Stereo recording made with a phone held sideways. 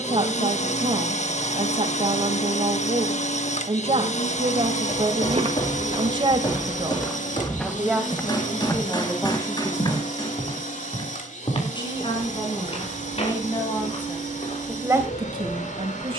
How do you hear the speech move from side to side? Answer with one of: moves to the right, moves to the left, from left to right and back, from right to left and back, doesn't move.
from right to left and back.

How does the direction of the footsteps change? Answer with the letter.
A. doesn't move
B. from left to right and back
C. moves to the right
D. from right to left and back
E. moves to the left
E.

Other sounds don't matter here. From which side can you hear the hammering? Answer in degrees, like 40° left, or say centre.
30° left.